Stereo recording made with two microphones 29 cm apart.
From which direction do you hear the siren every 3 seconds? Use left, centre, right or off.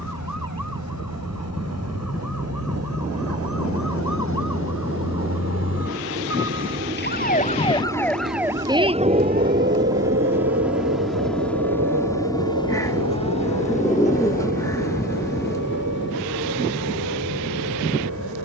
left, left, centre, right, right, right.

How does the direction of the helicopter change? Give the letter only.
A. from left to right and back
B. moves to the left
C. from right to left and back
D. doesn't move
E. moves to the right
B.